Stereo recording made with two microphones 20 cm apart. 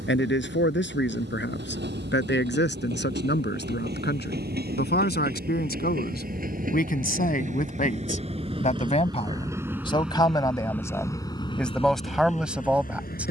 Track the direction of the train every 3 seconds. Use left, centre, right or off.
right, right, right, centre, left.